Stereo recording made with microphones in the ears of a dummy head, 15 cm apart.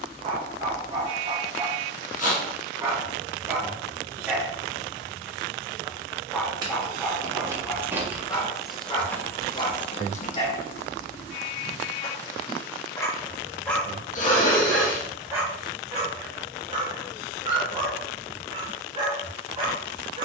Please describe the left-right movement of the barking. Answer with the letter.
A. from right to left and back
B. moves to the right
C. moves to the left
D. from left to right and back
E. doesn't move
A.